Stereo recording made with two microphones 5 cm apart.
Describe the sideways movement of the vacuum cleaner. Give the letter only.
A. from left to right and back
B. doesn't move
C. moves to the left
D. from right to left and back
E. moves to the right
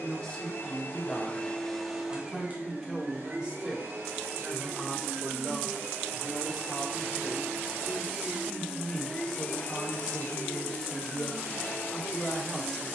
A.